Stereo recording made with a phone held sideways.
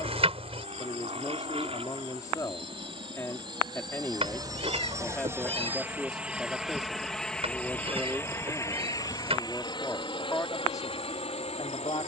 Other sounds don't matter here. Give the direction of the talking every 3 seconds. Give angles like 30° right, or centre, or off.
30° left, 10° left, centre, 20° left.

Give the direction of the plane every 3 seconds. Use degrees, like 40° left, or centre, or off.
50° right, 30° right, 10° left, 40° left.